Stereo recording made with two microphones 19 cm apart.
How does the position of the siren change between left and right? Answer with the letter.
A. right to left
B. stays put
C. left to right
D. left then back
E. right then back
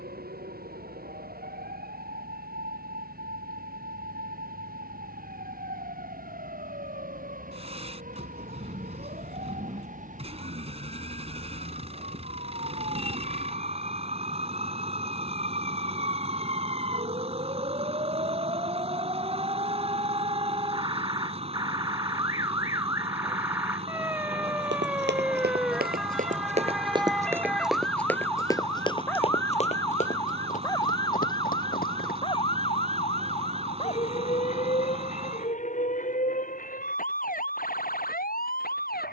A.